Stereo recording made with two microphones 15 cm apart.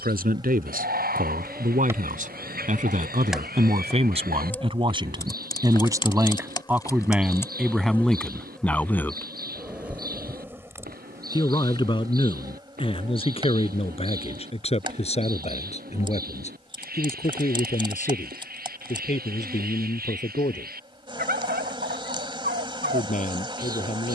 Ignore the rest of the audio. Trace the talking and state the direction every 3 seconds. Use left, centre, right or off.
right, right, centre, left, left, left, left, left.